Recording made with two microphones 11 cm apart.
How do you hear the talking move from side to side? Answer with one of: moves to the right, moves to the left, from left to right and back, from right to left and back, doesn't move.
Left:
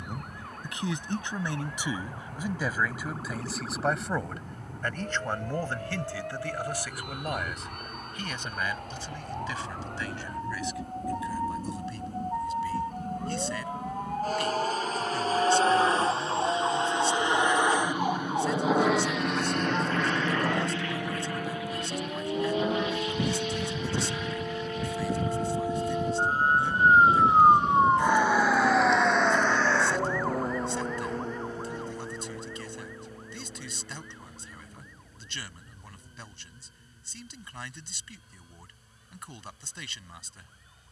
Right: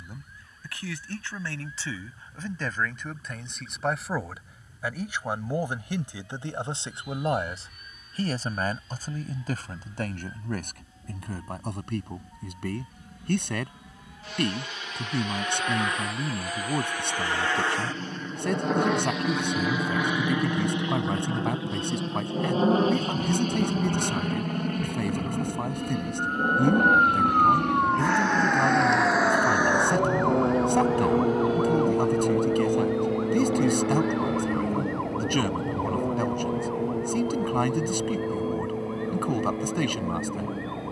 moves to the right.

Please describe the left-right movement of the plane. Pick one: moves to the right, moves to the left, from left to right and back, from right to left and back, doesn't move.
moves to the right.